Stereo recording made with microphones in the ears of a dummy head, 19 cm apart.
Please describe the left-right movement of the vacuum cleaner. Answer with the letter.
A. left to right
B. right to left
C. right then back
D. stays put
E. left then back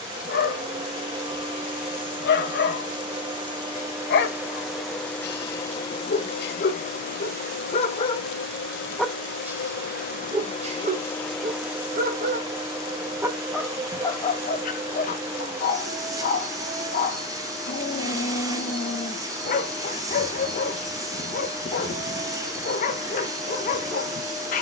E.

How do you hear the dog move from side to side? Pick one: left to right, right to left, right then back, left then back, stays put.
right then back.